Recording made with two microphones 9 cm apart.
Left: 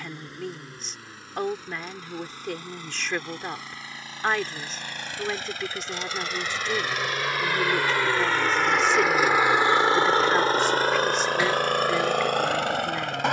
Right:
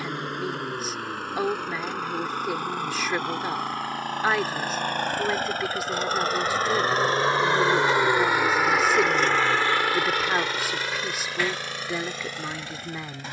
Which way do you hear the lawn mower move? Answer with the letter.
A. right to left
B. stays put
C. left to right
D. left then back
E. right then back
A.